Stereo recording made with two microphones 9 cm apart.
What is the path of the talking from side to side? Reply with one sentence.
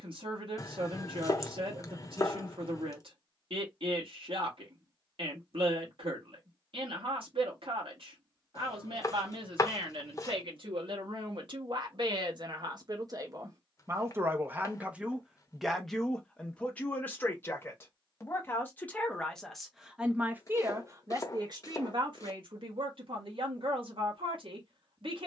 You can hear the talking move from right to left and back again.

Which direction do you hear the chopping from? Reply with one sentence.
In this clip you hear the chopping on the left.